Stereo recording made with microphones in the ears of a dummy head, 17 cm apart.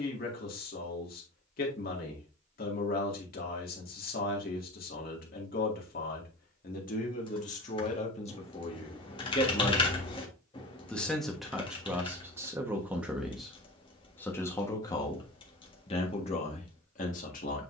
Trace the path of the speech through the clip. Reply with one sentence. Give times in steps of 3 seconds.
You can hear the speech on the left from 0 s, in the centre from 9 s and on the left from 15 s.